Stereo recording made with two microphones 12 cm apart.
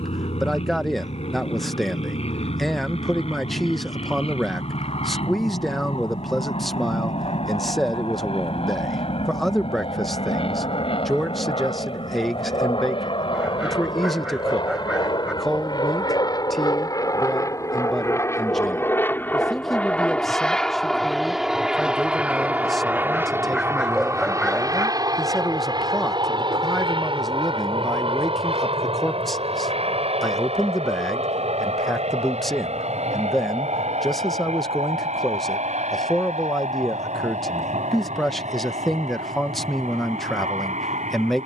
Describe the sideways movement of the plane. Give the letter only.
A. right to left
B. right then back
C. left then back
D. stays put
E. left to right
E.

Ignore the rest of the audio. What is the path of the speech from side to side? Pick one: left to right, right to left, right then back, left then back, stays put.
stays put.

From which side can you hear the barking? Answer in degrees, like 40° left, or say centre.
10° right.